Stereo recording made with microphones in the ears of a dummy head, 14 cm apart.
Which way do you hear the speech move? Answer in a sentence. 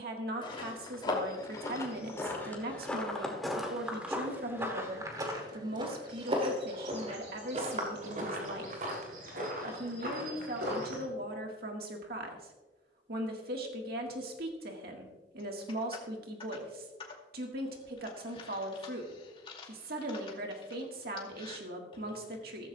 In this clip you hear the speech stay put.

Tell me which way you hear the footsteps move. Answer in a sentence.
In this clip you hear the footsteps travel towards the right.